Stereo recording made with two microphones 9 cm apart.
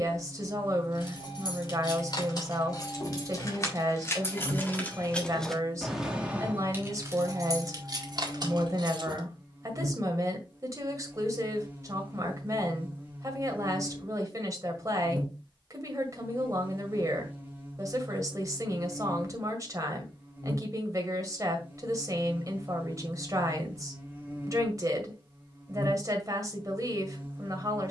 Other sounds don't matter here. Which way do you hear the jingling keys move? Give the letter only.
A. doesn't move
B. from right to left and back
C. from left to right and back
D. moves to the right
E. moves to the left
D.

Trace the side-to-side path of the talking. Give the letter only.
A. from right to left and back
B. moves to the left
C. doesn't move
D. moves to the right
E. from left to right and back
C.